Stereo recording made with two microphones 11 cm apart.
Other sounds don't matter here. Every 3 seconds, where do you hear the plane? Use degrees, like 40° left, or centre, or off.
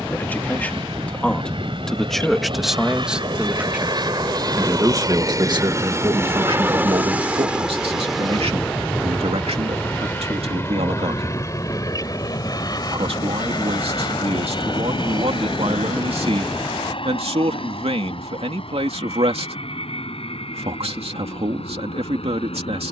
60° right, 40° right, 10° right, 20° left, 40° left, 50° left, 60° left, 60° left.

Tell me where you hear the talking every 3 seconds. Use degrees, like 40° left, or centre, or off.
10° left, 30° right, 70° right, 80° right, 80° right, 80° right, 80° right, 80° right.